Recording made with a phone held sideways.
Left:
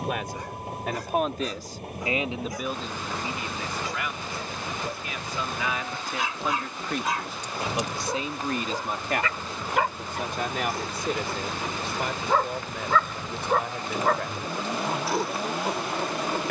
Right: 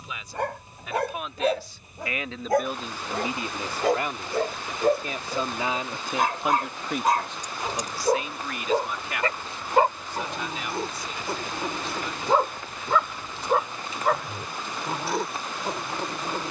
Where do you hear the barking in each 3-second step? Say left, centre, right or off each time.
right, right, right, right, centre, centre.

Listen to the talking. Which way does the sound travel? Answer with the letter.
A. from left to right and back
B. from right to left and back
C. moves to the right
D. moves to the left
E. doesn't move
A.